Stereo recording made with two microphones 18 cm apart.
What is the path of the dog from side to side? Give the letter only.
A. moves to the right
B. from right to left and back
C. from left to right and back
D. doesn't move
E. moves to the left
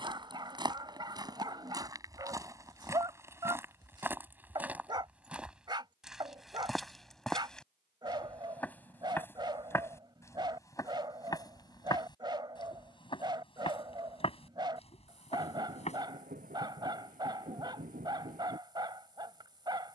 D.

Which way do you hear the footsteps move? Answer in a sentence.
You can hear the footsteps go from the right side to the left.